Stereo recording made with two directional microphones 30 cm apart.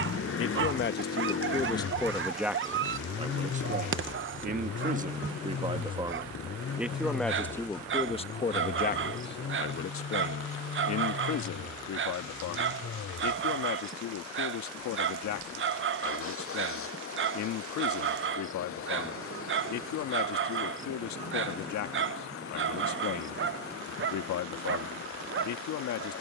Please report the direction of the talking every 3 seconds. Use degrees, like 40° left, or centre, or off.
20° left, 20° right, 10° left, 50° left, 70° left, 70° left, 70° left, 70° left, 70° left.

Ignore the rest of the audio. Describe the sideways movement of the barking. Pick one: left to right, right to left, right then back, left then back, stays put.
stays put.